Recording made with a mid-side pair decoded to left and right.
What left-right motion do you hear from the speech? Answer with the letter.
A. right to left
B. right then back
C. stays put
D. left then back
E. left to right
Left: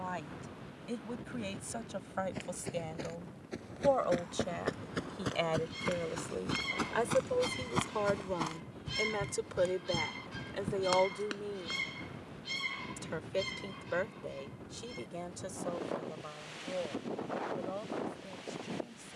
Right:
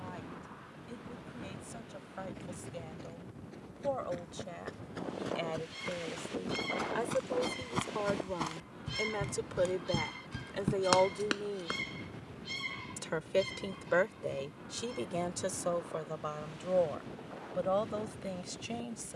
E.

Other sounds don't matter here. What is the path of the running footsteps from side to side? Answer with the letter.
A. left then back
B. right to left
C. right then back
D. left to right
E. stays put
D.